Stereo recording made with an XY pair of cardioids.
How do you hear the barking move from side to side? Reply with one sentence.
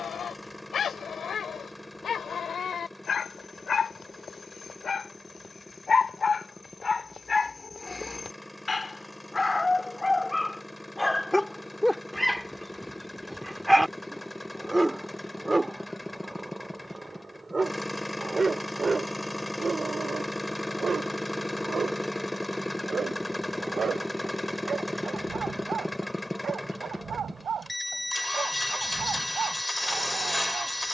You can hear the barking move to the right.